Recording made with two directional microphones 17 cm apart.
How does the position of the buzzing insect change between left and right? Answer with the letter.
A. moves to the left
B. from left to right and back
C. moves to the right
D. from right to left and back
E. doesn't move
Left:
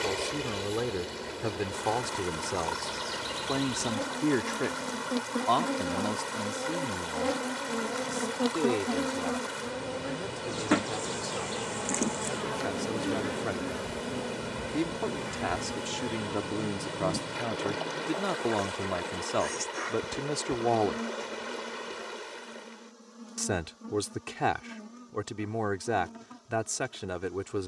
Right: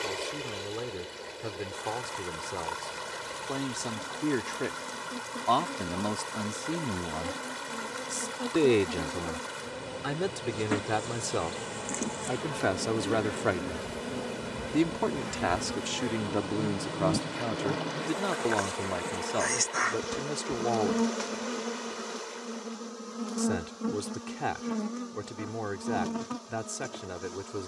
C.